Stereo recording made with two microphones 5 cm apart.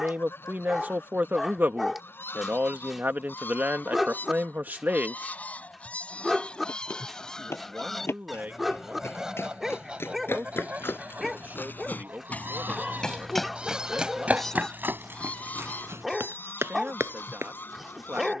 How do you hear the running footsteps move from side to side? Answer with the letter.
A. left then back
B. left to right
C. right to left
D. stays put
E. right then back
B.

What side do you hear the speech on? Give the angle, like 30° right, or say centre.
40° right.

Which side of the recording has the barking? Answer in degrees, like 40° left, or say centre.
10° right.